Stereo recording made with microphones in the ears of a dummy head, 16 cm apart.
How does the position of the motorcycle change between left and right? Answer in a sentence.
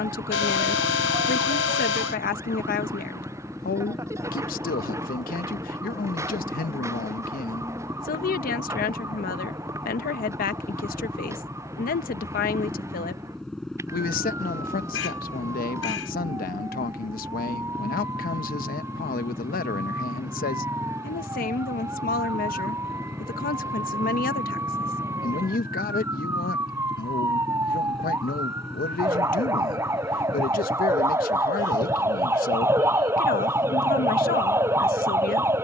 In this clip you hear the motorcycle stay in one place.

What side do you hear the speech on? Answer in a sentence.
You can hear the speech on the left.